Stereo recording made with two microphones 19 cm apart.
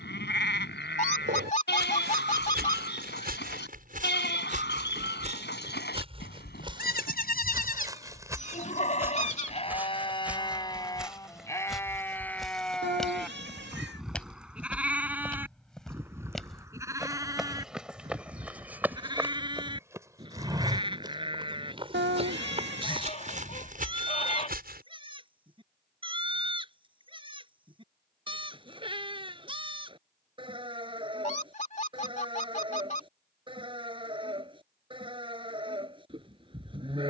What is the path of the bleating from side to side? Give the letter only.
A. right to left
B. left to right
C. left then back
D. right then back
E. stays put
B.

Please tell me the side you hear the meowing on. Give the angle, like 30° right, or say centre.
70° right.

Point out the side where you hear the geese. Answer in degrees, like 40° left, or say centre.
40° left.